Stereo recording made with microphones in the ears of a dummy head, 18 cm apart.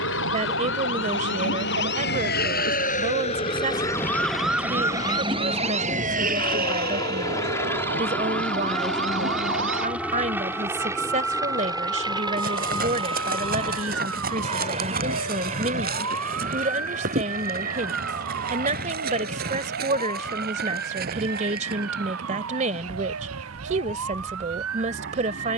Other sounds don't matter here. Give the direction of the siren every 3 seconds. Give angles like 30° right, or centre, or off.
60° left, centre, 50° right, 70° right, 70° right, 70° right, 80° right, 80° right, 80° right.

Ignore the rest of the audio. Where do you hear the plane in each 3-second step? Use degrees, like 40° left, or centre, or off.
60° left, 40° left, 10° left, 10° right, 30° right, 40° right, 40° right, 50° right, 50° right.